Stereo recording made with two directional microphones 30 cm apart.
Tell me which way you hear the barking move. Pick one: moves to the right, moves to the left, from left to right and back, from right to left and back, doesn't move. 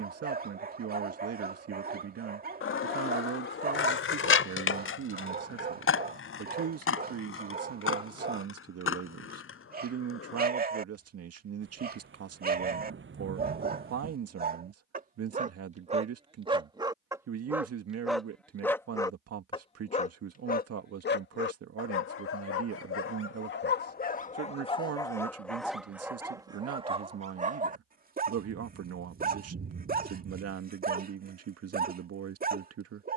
from right to left and back.